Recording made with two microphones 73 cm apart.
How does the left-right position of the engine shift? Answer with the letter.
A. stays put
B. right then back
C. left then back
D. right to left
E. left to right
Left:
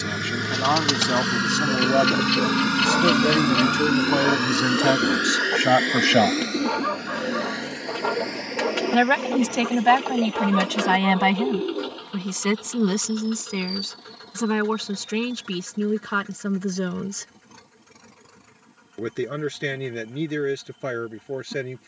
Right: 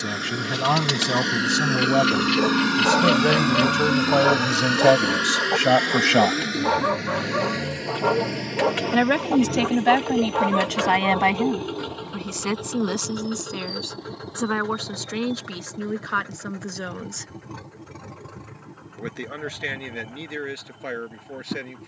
E.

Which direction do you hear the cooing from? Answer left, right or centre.
left.